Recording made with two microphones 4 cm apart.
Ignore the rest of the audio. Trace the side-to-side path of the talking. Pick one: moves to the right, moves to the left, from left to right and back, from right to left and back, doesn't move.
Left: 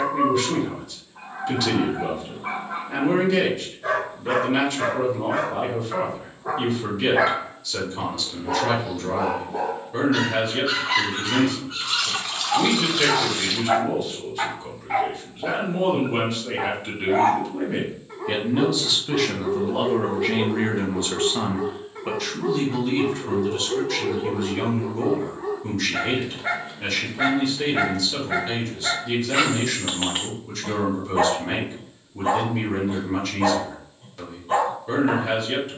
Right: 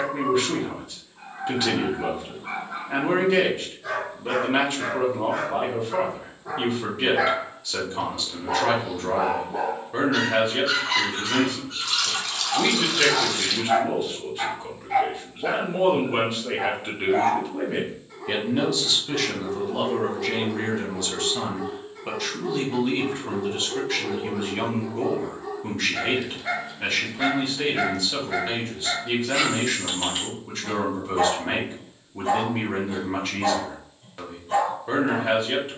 from right to left and back.